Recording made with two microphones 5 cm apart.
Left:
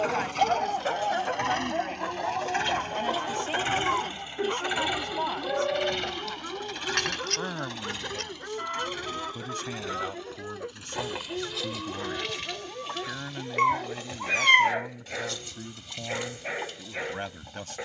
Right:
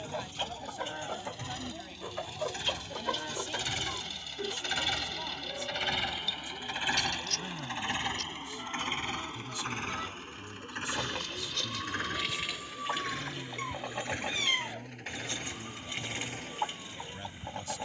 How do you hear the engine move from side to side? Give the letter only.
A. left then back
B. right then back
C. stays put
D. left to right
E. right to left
D.